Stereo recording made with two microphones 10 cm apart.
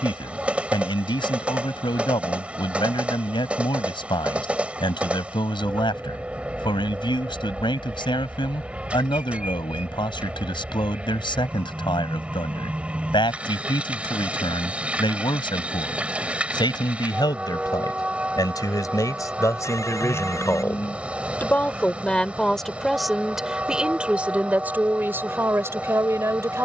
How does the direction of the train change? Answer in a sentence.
In this clip you hear the train stay in one place.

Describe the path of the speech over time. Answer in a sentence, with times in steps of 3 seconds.
You can hear the speech on the left from 0 s, in the centre from 21 s and on the right from 24 s.